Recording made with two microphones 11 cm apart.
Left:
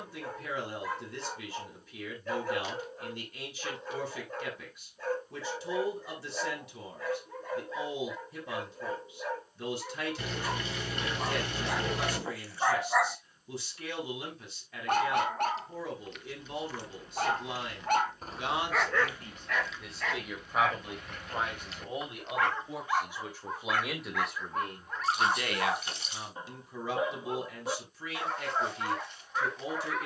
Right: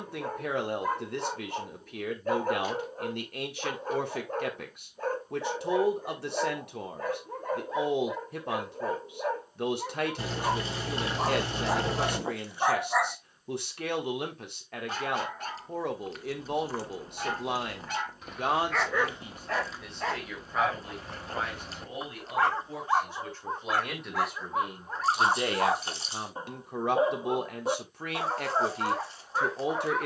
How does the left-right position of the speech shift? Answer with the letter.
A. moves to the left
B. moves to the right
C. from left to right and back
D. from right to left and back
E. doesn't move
D.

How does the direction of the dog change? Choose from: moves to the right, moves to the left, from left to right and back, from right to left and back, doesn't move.
from right to left and back.